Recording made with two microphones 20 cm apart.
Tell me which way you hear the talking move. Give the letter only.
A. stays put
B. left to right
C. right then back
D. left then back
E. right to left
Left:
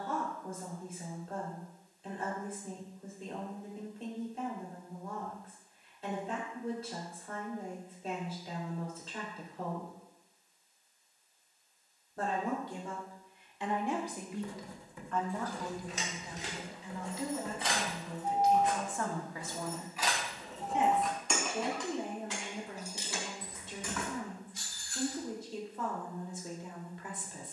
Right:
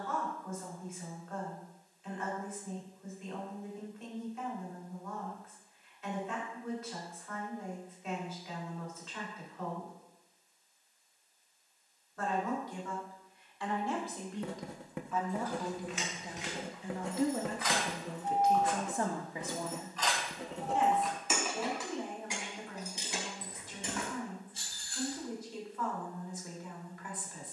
C.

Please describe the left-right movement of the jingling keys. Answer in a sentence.
In this clip you hear the jingling keys travel towards the right.